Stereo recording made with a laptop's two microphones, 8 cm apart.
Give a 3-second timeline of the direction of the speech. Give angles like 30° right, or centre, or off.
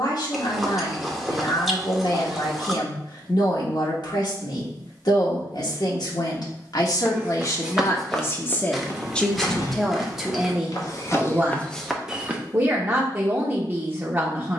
70° left, 70° left, 50° left, 10° right, 20° right.